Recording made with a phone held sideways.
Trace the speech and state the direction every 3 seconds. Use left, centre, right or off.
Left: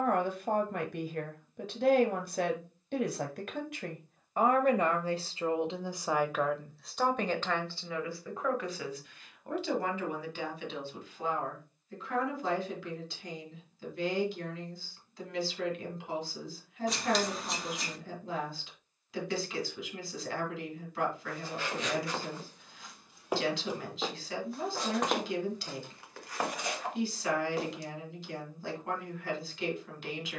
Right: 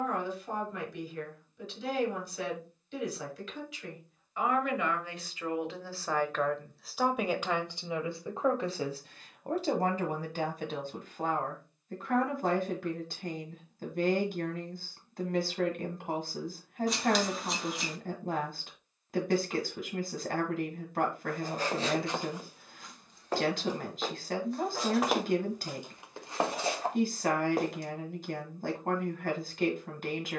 left, left, centre, right, right, right, right, right, right, right.